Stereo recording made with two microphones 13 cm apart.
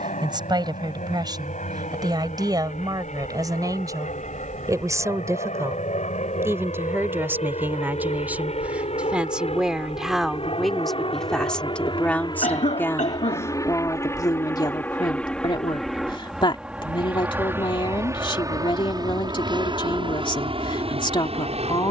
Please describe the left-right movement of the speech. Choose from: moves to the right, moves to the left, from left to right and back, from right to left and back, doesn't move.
moves to the left.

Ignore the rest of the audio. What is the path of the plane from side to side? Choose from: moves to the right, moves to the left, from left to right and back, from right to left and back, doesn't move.
moves to the right.